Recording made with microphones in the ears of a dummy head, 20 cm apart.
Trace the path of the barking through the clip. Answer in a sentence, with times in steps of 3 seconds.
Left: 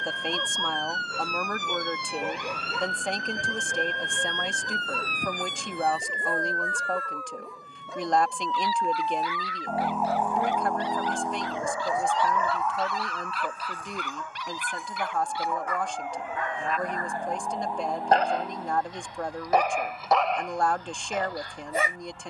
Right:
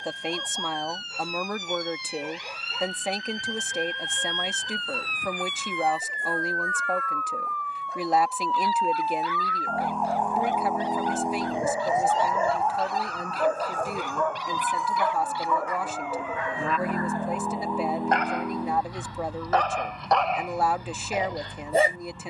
In this clip you hear the barking on the left from 0 s, in the centre from 18 s and on the right from 21 s.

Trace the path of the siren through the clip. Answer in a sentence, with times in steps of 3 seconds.
In this clip you hear the siren on the left from 0 s, in the centre from 9 s and on the right from 12 s.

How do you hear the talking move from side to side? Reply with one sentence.
In this clip you hear the talking stay put.